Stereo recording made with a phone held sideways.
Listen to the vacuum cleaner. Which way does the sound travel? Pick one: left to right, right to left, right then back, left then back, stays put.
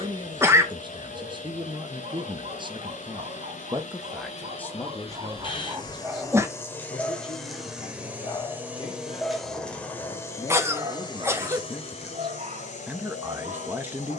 right then back.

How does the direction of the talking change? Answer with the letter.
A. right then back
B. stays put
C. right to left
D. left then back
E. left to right
D.